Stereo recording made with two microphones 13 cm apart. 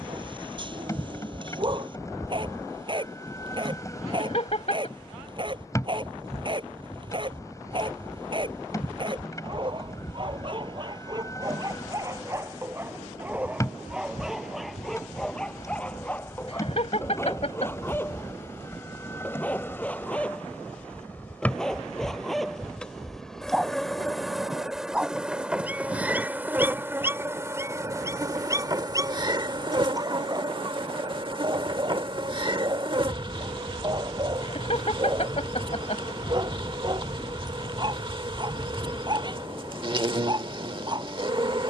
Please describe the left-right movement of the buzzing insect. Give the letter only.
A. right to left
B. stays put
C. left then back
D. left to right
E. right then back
D.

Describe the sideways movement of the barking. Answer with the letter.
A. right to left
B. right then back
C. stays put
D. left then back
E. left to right
D.